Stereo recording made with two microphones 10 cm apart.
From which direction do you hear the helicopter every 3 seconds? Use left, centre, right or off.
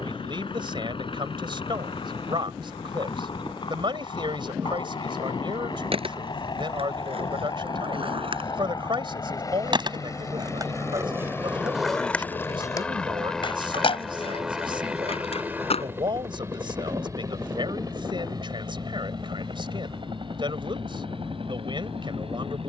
left, left, left, left, centre, right, right, right.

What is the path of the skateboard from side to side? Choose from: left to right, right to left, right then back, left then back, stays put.
right to left.